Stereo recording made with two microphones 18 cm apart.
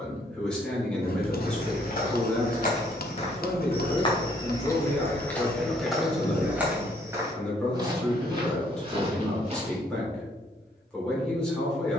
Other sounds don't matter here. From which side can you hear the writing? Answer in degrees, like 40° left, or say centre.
60° left.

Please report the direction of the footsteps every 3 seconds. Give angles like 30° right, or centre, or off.
50° left, 20° left, 20° right, 30° right.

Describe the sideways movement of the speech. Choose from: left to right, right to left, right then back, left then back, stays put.
stays put.